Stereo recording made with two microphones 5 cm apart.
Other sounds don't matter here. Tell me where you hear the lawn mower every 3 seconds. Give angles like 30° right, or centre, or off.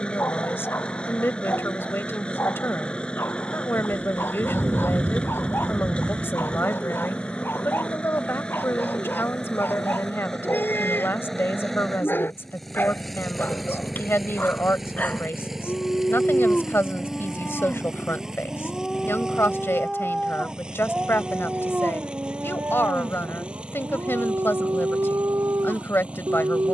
20° left, 20° left, 20° left, 10° left, centre, 10° right, 10° right, 20° right, 20° right.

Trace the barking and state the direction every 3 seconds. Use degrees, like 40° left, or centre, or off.
50° left, 50° left, 50° left, 50° left, 40° left, 30° left, centre, 40° right, 80° right.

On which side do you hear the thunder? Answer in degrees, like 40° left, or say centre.
30° right.